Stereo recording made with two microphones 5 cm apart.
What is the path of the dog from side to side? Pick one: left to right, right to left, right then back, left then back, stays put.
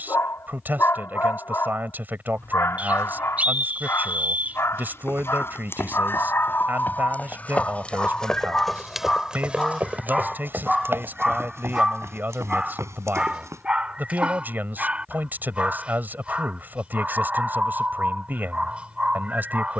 left to right.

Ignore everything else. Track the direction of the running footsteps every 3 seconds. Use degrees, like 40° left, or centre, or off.
off, 50° left, 30° left, 40° right, 70° right, off, off.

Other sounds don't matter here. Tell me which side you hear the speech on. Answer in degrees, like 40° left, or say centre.
40° right.